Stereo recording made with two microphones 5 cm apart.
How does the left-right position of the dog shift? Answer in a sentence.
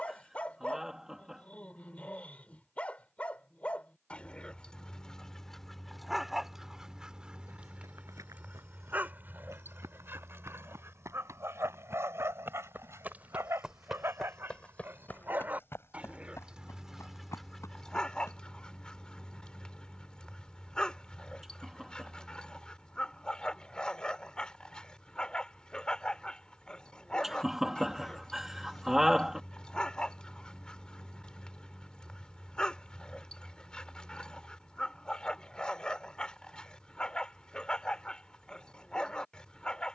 In this clip you hear the dog move from left to right and back again.